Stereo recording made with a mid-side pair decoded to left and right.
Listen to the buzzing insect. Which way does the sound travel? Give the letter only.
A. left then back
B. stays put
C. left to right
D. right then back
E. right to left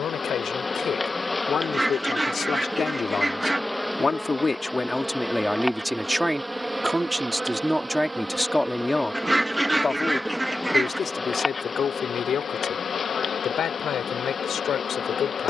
D.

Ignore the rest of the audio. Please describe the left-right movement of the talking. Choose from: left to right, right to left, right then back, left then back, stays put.
right then back.